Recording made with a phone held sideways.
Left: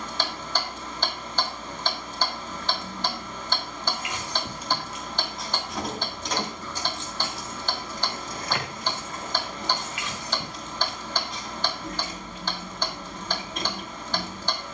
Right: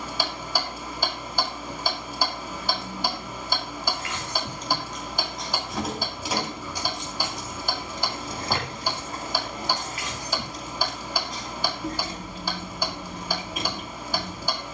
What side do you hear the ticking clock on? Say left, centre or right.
centre.